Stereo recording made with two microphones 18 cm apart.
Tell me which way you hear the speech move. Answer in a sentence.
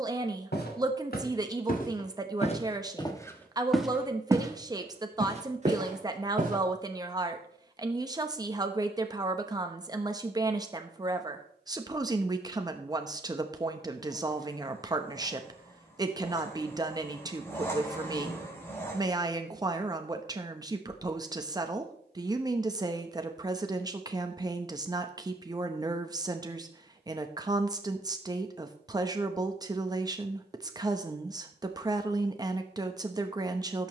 You can hear the speech stay in one place.